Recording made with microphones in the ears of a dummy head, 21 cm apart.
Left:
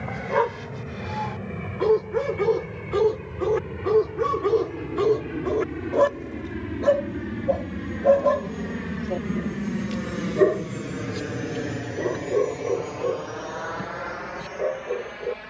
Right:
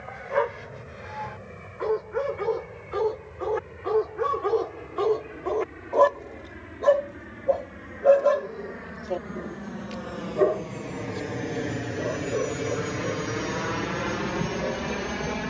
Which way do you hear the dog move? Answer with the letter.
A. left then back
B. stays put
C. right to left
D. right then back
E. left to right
D.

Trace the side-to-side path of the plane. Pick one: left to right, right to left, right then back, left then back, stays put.
left to right.